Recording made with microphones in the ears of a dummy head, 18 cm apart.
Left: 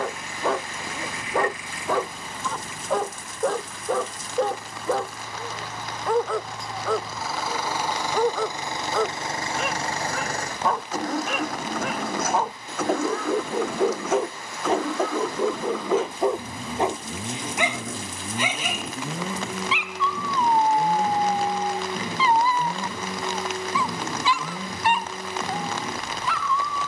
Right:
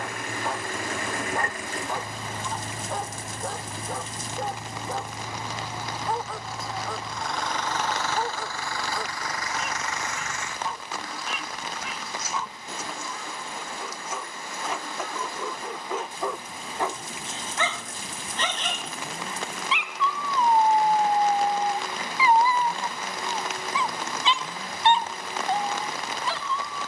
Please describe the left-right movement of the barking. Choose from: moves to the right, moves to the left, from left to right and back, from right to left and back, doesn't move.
moves to the right.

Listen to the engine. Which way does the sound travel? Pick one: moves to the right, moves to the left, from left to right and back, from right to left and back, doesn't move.
moves to the left.